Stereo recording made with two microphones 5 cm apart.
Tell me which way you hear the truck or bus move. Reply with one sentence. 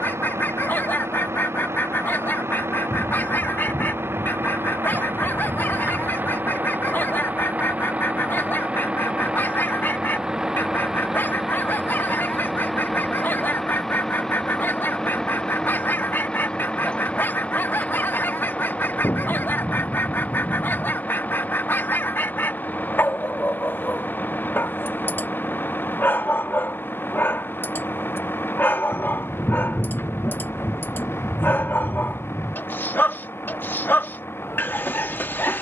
In this clip you hear the truck or bus move from right to left.